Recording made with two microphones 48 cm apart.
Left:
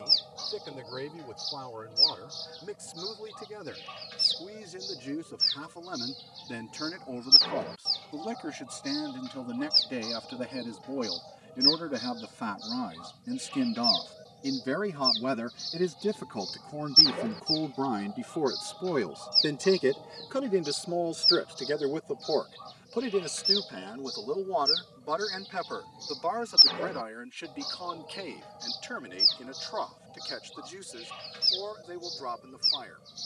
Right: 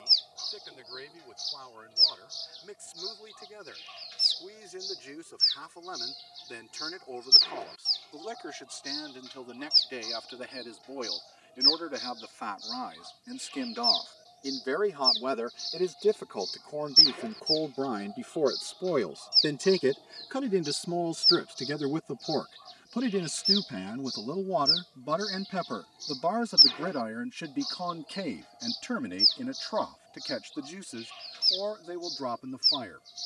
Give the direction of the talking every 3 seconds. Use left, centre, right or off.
left, left, left, left, left, left, centre, right, right, right, right.